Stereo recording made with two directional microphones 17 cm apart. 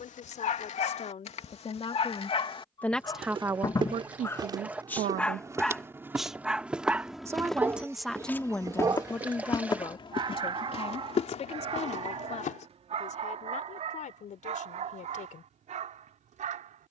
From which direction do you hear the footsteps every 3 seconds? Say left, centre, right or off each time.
off, right, centre, left, left, off.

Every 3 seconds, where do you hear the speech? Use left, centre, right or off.
left, right, centre, left, left, left.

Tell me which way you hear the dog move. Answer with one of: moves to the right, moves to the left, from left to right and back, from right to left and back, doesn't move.
moves to the right.